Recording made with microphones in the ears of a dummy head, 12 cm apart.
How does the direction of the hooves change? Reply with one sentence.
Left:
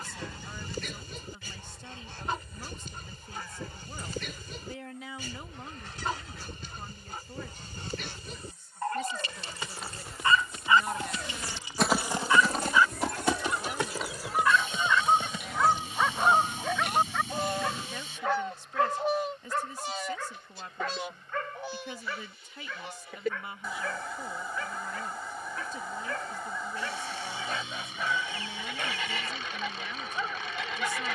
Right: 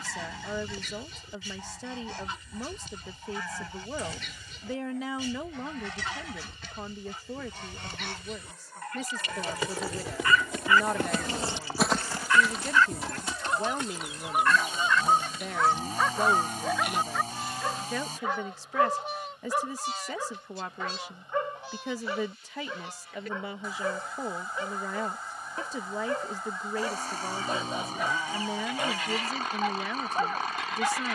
In this clip you hear the hooves travel towards the left.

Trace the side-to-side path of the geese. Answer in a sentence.
In this clip you hear the geese move to the left.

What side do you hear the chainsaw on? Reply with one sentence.
You can hear the chainsaw on the right.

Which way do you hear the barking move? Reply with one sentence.
You can hear the barking travel towards the right.